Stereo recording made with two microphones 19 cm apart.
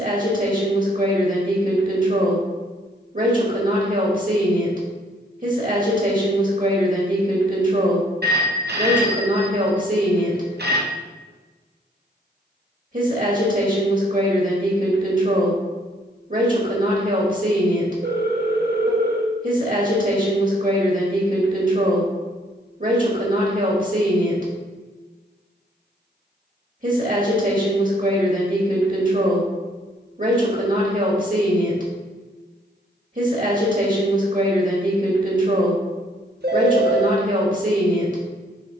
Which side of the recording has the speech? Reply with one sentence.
In this clip you hear the speech on the right.